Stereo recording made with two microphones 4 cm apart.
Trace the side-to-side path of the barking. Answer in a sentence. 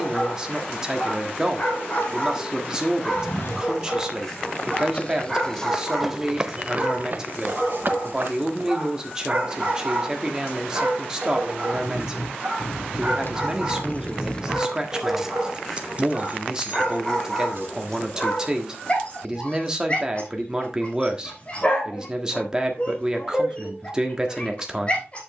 In this clip you hear the barking move from left to right and back again.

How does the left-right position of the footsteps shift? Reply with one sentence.
In this clip you hear the footsteps travel towards the right.